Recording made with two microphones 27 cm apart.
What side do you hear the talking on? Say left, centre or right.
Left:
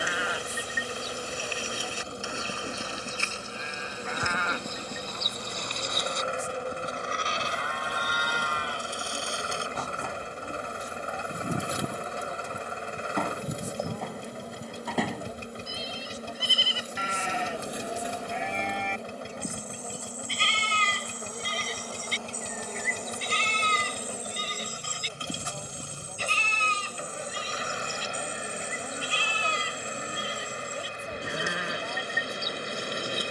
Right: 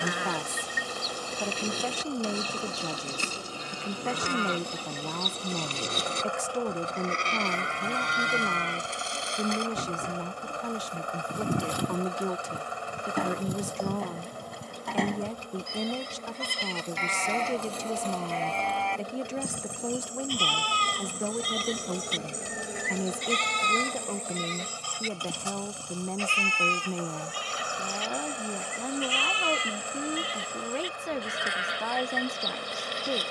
right.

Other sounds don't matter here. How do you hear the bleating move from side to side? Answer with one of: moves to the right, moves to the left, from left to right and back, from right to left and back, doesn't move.
moves to the left.